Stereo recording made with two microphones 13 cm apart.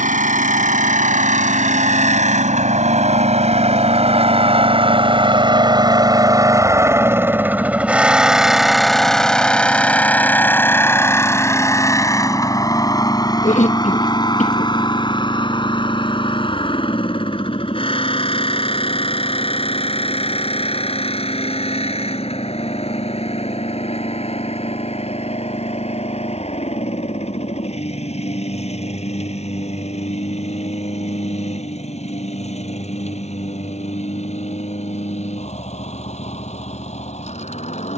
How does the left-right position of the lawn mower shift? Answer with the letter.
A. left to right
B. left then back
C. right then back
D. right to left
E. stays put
D.